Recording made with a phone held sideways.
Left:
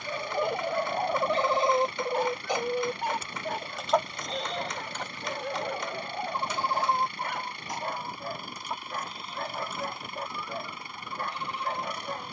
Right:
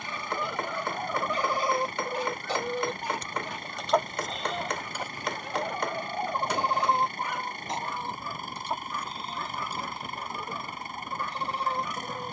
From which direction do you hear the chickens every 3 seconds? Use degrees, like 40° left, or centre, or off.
30° left, 10° right, 20° right, 30° right.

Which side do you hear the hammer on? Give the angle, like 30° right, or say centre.
60° right.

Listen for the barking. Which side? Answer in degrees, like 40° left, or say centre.
60° left.